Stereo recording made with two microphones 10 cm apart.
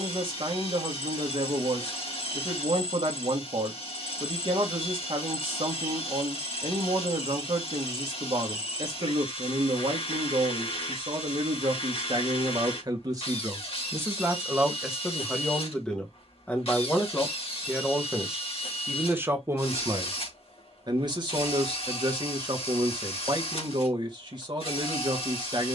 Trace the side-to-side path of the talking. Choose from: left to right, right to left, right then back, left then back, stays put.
left then back.